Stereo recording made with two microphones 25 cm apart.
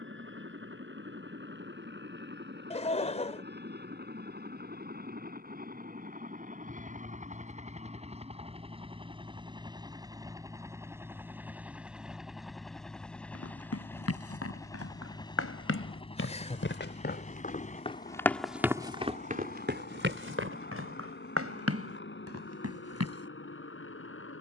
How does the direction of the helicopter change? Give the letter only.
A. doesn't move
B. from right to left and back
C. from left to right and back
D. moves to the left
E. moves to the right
D.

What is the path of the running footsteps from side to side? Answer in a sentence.
In this clip you hear the running footsteps move from left to right.